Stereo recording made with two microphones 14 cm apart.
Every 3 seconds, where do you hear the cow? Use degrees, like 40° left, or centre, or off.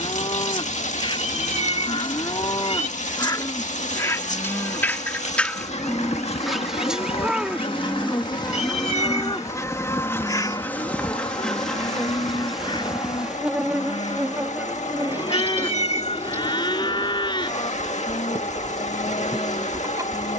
40° left, 20° left, centre, 30° left, 40° left, 40° left, 40° left.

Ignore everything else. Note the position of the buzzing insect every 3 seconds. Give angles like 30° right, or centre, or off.
70° left, 60° left, 40° left, 10° left, 10° right, 20° right, 30° right.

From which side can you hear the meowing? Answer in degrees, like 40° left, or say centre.
50° left.